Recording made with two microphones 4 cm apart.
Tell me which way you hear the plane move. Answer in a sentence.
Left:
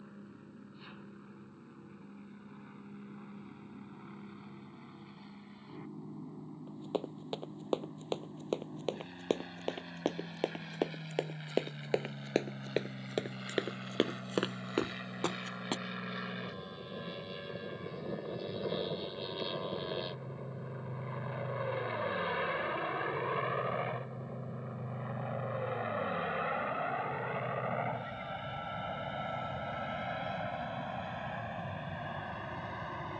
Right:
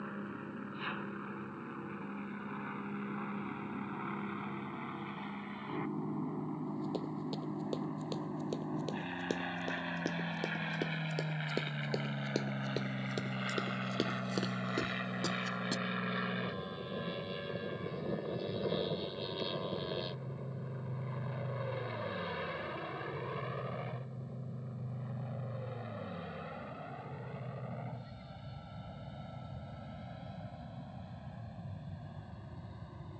You can hear the plane travel towards the left.